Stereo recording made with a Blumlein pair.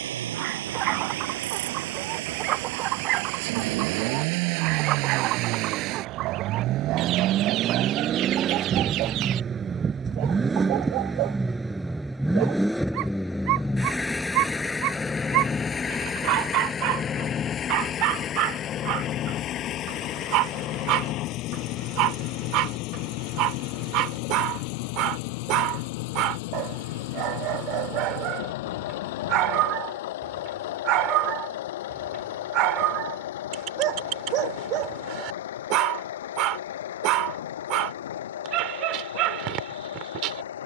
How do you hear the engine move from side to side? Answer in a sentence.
You can hear the engine go from the right side to the left.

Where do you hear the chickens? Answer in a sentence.
You can hear the chickens on the right.